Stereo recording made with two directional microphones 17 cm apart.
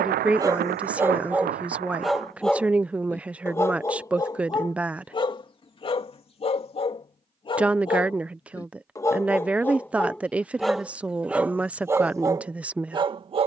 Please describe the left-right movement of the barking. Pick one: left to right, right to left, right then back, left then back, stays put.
left then back.